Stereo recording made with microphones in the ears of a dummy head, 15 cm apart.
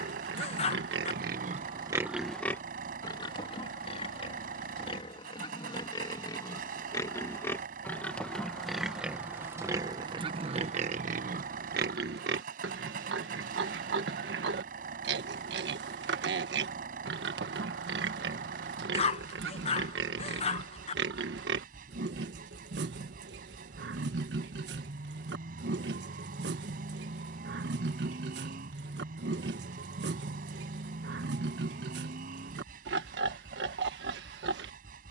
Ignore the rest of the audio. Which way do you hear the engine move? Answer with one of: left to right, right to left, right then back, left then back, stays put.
stays put.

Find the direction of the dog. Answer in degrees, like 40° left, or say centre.
40° left.